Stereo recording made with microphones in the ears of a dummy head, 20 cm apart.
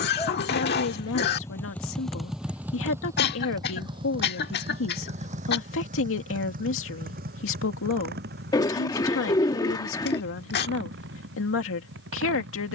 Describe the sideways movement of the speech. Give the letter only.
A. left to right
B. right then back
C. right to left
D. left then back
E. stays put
E.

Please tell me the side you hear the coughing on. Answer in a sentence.
In this clip you hear the coughing on the left.